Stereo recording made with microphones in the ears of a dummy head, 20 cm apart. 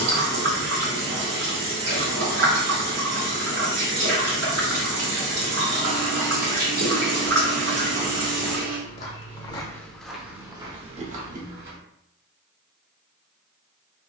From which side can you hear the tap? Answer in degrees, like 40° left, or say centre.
90° right.